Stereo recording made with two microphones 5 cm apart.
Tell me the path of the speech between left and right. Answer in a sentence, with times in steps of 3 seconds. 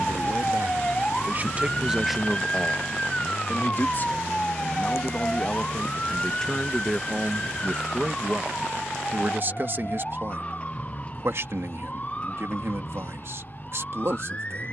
You can hear the speech on the right from 0 s, on the left from 3 s, in the centre from 6 s and on the right from 9 s.